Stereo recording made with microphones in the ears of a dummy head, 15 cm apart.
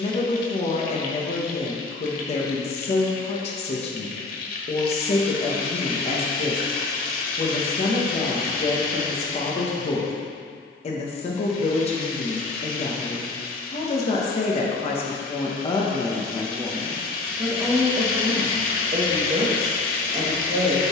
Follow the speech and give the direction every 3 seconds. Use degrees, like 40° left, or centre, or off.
40° left, 40° left, 40° left, 40° left, 40° left, 10° left, 30° right.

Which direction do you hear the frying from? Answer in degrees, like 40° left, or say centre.
60° left.